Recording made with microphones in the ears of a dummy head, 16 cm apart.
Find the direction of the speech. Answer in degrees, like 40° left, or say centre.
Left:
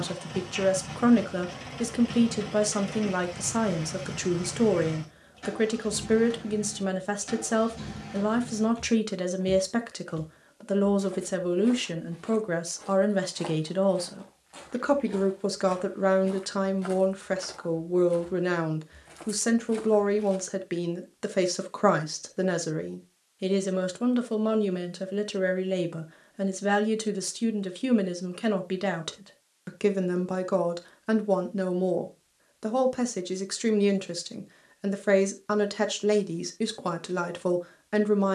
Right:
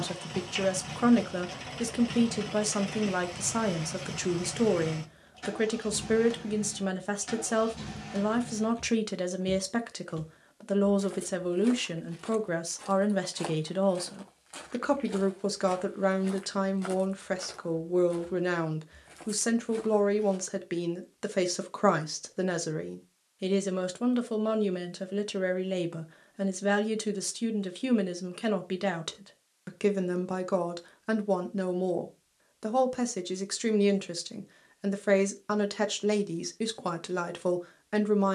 10° right.